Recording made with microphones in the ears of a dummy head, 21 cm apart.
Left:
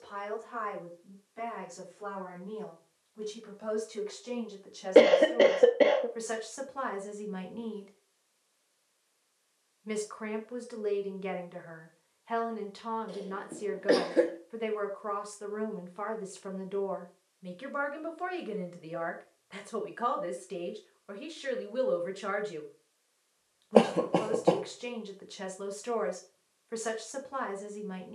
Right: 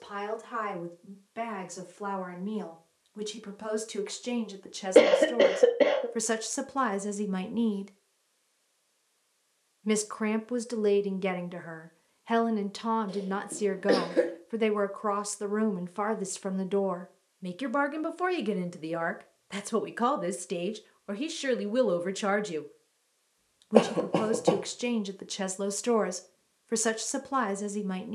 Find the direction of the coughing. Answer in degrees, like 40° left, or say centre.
centre.